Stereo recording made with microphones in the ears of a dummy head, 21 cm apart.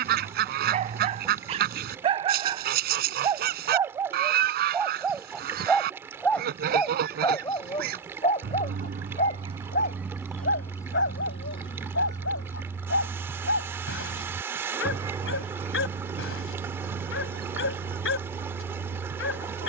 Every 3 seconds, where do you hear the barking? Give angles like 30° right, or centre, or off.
30° right, 10° right, 20° left, 50° left, 60° left, 60° left, 60° left.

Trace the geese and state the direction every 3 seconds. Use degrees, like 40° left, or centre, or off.
40° right, 40° right, 40° right, centre, centre, 30° right, 40° right.